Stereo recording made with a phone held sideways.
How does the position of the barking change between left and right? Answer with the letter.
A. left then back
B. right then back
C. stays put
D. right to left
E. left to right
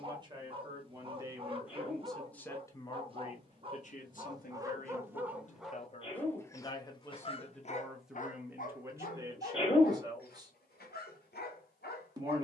D.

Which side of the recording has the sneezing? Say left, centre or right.
left.